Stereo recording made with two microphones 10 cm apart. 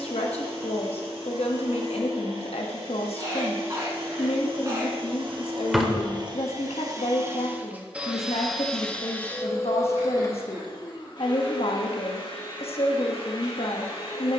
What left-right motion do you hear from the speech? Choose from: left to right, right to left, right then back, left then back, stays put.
stays put.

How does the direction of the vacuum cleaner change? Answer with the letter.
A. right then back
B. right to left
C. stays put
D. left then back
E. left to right
B.